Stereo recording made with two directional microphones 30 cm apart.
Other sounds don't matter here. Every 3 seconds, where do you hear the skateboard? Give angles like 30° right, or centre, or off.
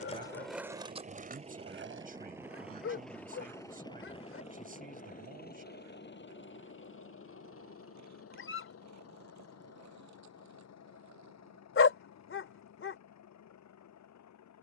30° right, 60° right, 60° right, 70° right, off.